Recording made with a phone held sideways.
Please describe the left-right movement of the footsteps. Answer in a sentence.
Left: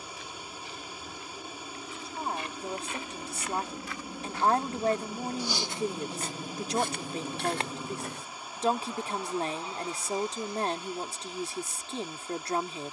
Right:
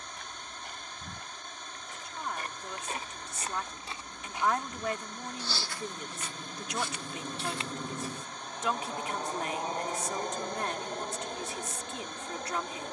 In this clip you hear the footsteps move from right to left.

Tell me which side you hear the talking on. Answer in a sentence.
You can hear the talking on the left.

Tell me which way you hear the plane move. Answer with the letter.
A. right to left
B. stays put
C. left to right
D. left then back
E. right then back
C.